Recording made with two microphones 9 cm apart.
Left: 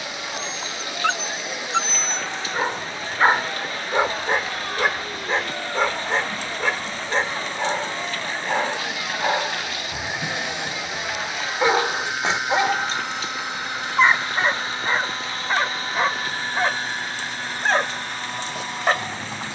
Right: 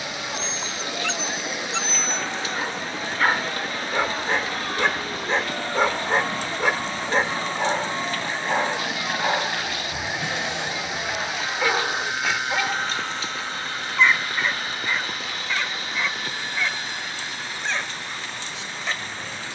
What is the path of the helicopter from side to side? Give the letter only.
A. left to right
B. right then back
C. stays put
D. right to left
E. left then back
D.